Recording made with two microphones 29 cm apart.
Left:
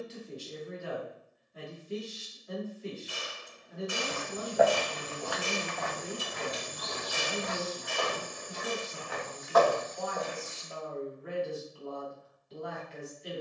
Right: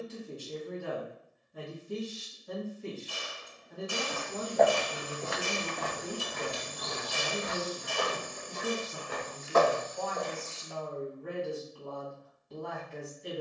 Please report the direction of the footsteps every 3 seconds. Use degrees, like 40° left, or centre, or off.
off, 10° right, 60° right, 10° right, off.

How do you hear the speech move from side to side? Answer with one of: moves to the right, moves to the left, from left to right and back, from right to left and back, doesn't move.
doesn't move.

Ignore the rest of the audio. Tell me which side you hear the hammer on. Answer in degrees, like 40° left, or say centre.
20° left.